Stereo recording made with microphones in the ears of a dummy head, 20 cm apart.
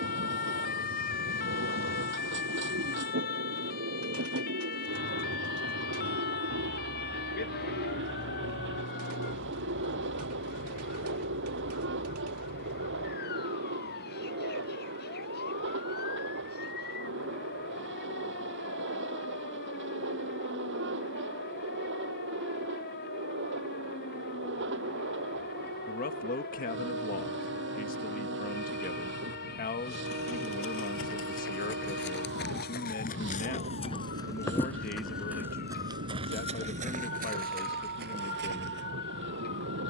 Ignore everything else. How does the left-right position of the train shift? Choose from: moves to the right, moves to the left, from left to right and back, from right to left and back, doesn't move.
doesn't move.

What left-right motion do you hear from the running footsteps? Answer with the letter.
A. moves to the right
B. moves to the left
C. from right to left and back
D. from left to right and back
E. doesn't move
A.